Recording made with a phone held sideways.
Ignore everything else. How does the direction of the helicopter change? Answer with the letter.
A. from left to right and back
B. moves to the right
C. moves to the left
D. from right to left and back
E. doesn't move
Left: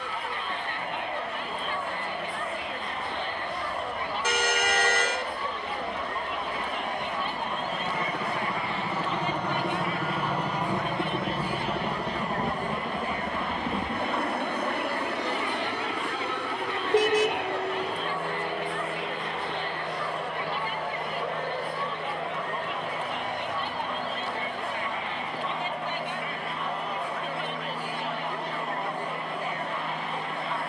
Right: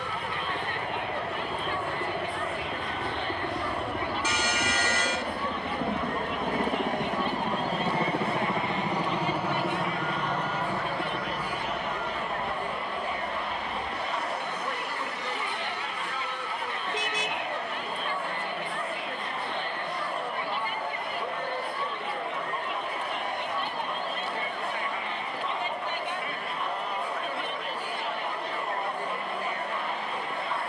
C.